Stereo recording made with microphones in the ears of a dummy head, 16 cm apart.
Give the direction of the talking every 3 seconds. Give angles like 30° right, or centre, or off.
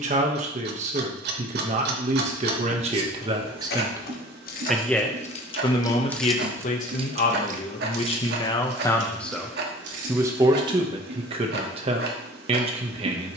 40° right, 10° right, 30° left, 20° right, 30° right.